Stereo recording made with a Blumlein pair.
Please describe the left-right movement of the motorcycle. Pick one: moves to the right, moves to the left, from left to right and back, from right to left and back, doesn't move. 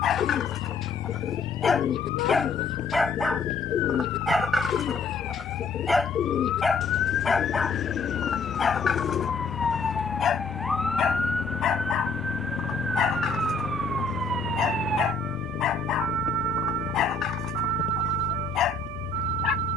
doesn't move.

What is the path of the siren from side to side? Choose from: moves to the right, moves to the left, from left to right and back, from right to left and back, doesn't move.
moves to the right.